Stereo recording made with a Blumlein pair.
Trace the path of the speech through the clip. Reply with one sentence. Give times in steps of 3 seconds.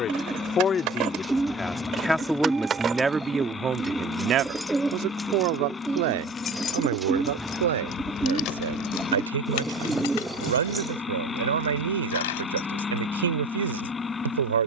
In this clip you hear the speech in the centre from 0 s and on the right from 3 s.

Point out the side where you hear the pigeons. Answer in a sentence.
You can hear the pigeons in the centre.